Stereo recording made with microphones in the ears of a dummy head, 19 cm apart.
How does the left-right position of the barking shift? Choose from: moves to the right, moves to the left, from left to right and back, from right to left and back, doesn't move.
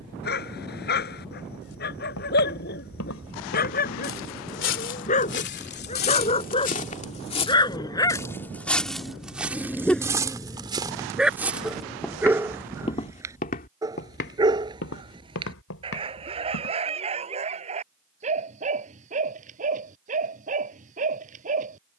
moves to the right.